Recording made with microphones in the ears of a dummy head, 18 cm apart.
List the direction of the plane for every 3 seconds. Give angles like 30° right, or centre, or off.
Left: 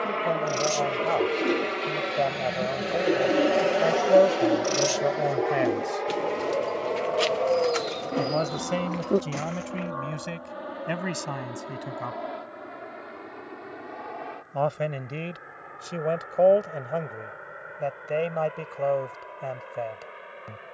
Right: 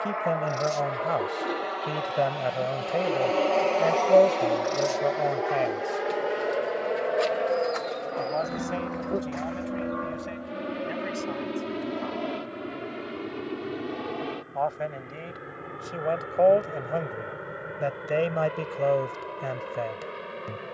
30° left, 10° left, 20° right, 30° right, 40° right, 40° right, 50° right.